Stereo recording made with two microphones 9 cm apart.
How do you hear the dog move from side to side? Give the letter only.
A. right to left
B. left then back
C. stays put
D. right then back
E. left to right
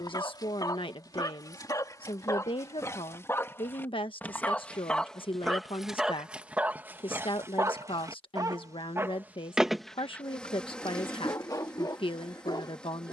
D.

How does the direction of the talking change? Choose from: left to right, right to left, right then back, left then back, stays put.
stays put.